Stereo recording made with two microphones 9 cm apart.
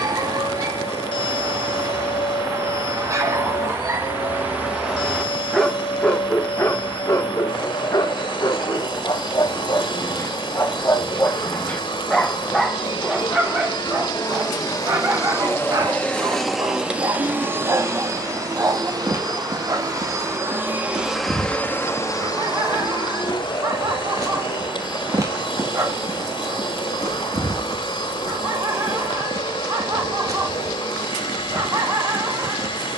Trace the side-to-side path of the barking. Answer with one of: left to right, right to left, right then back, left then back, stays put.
left then back.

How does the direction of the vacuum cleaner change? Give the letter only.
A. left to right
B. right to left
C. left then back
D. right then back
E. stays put
D.